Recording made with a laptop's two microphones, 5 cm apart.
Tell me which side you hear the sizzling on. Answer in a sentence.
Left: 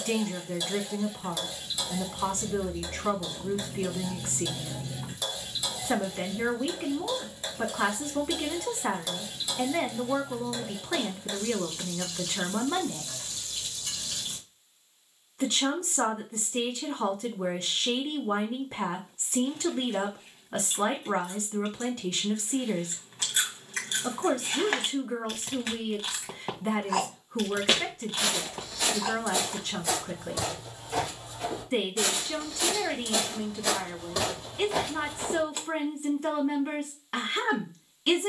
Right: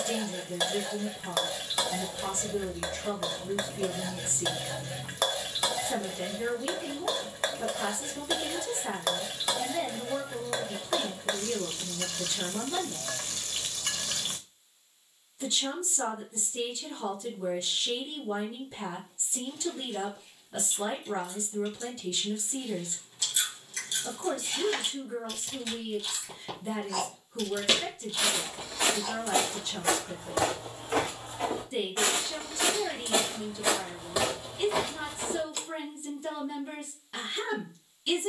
You can hear the sizzling on the right.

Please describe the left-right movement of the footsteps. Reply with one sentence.
In this clip you hear the footsteps move from left to right and back again.